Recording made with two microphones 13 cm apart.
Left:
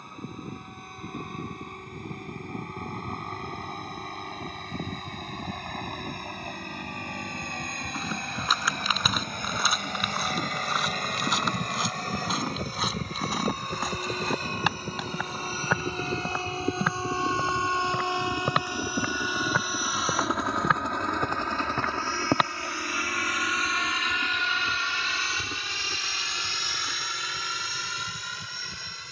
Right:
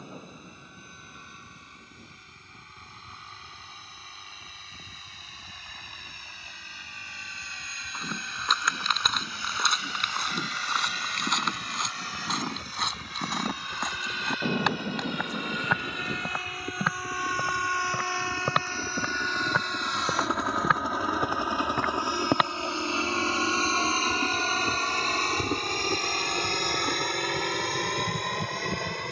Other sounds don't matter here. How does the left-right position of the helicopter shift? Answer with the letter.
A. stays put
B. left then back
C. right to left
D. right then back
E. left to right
E.